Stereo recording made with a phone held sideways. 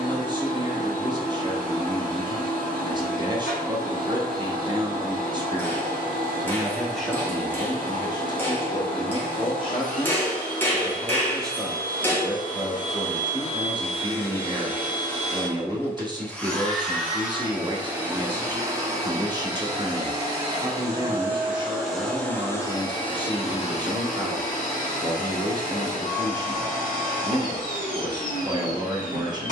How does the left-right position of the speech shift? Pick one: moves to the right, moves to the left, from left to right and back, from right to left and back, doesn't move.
from right to left and back.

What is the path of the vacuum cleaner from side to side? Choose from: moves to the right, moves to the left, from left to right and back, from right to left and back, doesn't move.
from left to right and back.